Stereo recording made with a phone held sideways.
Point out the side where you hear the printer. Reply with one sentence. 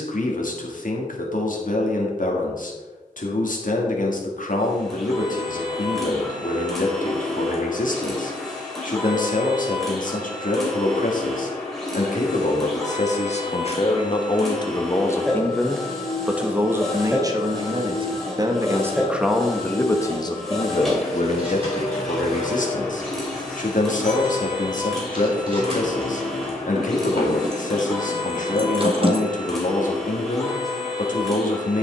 You can hear the printer in the centre.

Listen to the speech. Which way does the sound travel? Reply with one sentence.
You can hear the speech go right and come back.